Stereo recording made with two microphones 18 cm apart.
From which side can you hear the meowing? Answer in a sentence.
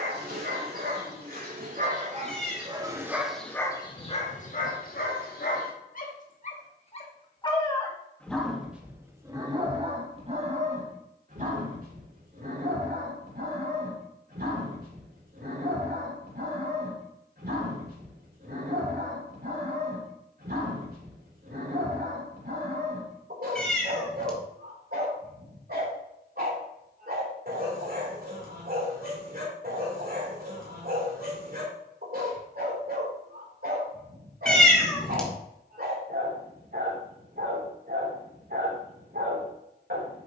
In this clip you hear the meowing in the centre.